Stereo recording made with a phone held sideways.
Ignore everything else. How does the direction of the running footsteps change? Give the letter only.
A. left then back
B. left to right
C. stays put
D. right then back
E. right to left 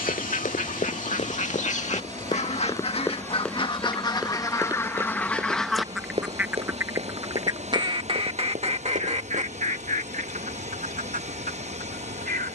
B.